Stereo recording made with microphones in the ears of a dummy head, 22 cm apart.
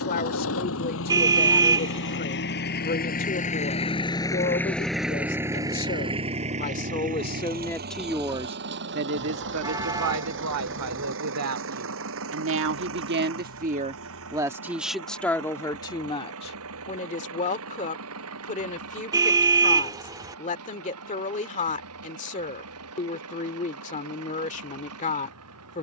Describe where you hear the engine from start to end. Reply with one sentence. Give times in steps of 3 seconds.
In this clip you hear the engine on the left from 0 s, in the centre from 3 s and on the right from 6 s.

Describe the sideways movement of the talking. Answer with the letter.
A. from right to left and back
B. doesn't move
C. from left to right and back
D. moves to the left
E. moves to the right
C.